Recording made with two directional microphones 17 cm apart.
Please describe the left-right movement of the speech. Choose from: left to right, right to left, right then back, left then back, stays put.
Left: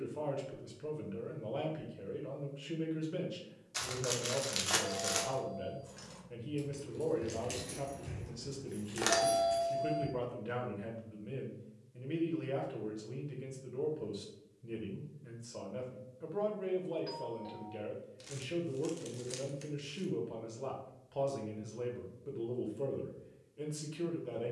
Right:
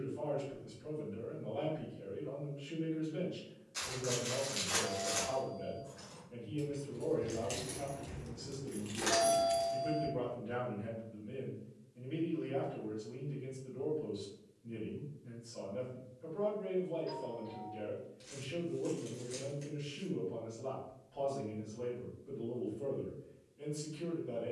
stays put.